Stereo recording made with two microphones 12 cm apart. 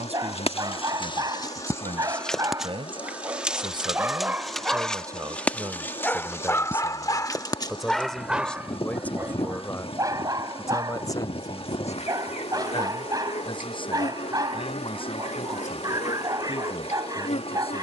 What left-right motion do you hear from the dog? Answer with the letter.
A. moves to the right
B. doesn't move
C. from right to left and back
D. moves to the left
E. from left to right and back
C.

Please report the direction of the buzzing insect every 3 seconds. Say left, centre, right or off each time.
left, centre, left, left, left, left.